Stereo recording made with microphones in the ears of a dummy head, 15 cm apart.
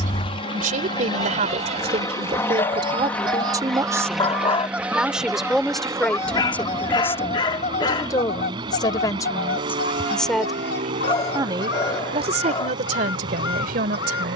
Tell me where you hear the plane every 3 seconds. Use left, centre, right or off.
left, centre, right, right, right.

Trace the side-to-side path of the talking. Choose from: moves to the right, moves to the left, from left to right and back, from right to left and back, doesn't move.
from right to left and back.